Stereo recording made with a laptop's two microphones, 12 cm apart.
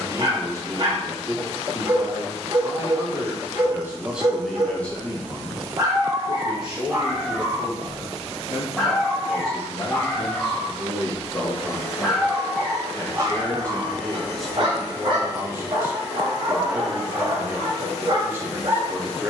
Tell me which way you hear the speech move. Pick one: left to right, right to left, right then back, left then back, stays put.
left then back.